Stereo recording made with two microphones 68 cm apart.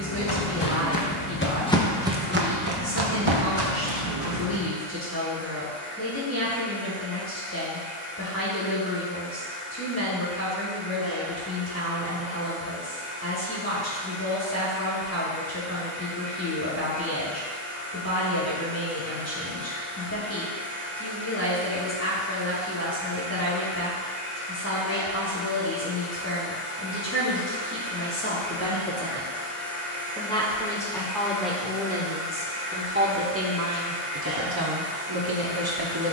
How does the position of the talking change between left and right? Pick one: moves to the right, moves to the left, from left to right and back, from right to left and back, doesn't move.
moves to the right.